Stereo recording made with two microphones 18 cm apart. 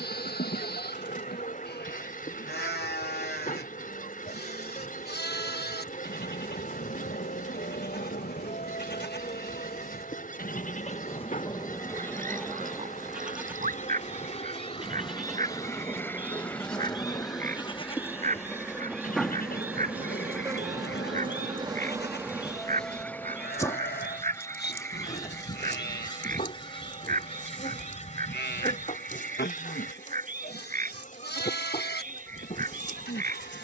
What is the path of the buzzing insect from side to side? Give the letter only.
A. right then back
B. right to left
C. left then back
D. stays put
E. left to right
A.